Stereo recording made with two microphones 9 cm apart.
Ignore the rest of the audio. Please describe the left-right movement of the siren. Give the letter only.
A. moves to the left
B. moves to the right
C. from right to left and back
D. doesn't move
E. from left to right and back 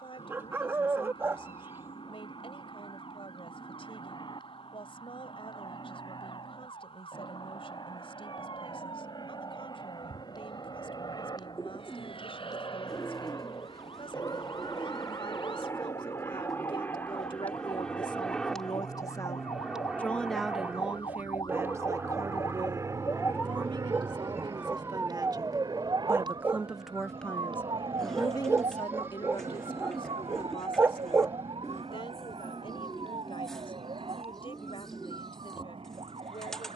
B.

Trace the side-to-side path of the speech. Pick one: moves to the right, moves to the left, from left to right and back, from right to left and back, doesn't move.
from left to right and back.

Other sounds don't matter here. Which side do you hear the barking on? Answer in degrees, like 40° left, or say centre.
20° right.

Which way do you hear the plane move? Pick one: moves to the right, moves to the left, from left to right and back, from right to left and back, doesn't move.
moves to the right.